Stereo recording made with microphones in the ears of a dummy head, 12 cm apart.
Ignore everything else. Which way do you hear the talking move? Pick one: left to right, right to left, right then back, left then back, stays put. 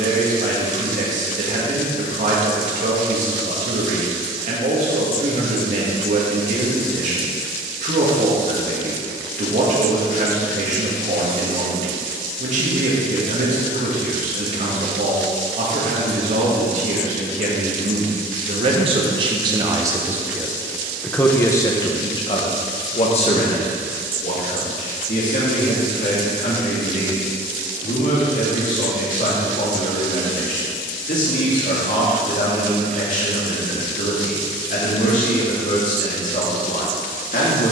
right to left.